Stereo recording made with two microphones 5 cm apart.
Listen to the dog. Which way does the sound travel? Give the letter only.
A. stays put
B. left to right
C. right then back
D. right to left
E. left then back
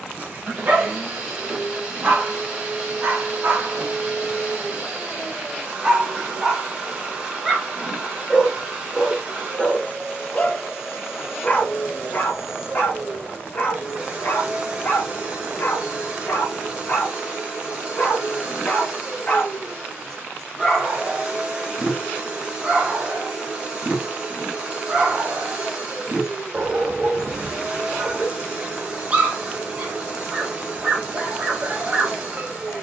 E.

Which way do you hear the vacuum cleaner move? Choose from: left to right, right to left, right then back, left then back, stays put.
stays put.